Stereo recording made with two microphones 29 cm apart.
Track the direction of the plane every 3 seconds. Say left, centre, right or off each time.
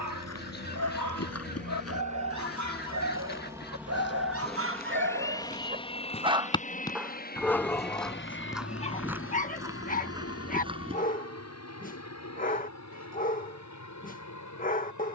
right, centre, left, left, left.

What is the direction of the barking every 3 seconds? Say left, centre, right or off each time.
right, right, centre, left, left.